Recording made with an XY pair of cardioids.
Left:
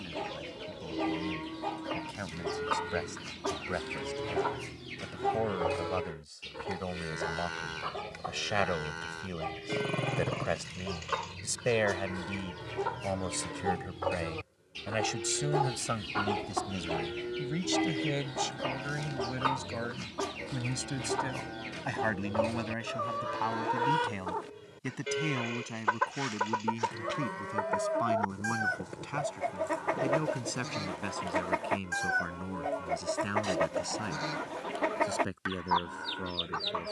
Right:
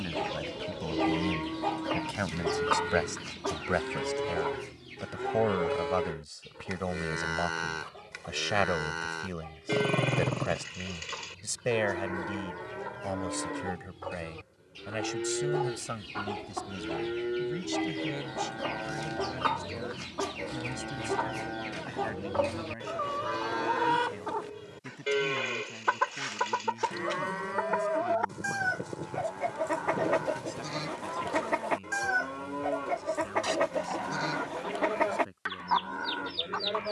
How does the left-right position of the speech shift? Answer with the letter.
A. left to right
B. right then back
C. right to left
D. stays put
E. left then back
C.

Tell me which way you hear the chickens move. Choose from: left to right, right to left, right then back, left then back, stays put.
left then back.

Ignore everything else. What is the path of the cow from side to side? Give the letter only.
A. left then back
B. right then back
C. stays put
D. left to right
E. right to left
C.